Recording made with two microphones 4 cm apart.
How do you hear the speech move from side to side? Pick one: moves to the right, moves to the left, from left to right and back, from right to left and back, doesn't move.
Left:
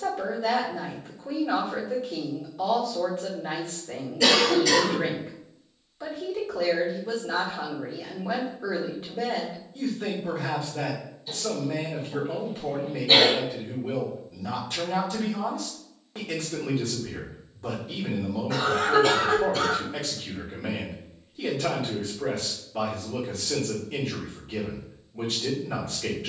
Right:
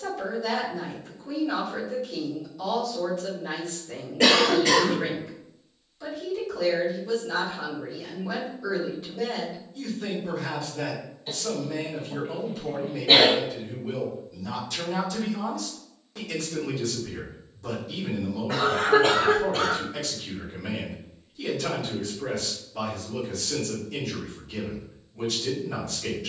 doesn't move.